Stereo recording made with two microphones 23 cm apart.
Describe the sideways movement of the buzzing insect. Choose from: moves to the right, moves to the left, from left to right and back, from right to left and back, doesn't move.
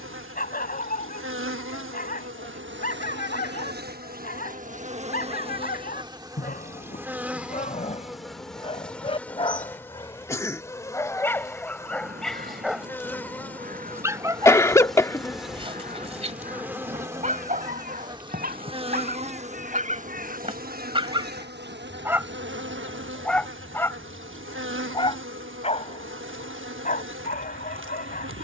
from right to left and back.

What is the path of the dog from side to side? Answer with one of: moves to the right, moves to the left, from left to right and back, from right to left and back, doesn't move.
from left to right and back.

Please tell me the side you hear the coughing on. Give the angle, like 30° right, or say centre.
10° left.